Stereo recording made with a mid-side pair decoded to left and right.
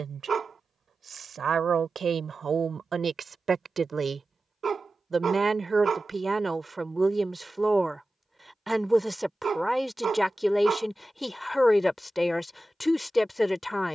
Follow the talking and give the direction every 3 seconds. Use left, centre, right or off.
right, right, centre, centre, centre.